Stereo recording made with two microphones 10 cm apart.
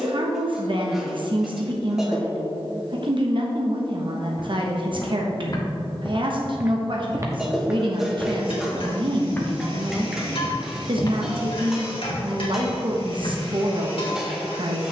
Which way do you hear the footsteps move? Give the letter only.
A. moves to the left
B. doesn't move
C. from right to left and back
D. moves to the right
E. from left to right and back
E.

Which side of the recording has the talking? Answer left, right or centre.
right.